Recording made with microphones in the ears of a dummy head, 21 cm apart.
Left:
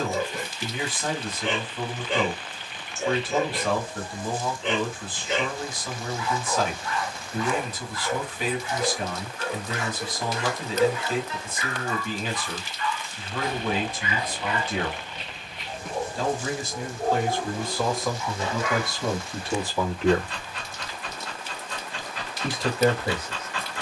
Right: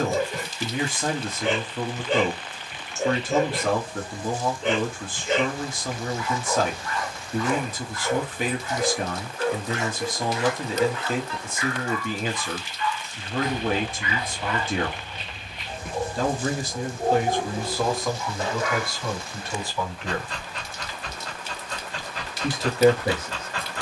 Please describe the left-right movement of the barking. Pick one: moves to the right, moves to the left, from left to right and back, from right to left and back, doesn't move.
from right to left and back.